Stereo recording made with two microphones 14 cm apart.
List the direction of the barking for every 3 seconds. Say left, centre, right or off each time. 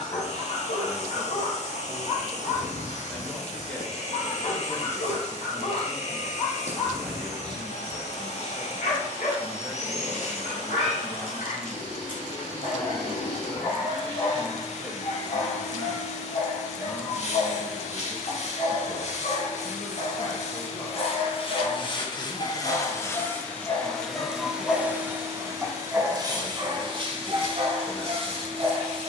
left, left, left, left, left, left, left, left, centre, right.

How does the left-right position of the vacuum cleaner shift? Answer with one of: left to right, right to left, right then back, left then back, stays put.
left to right.